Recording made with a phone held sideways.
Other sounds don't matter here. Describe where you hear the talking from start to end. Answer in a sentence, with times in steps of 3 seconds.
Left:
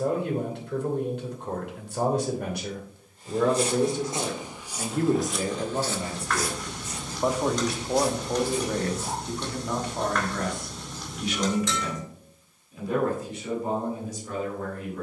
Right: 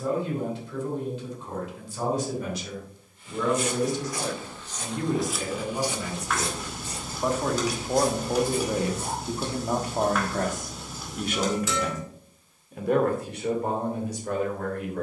In this clip you hear the talking on the left from 0 s, in the centre from 6 s and on the right from 9 s.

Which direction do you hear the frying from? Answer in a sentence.
In this clip you hear the frying in the centre.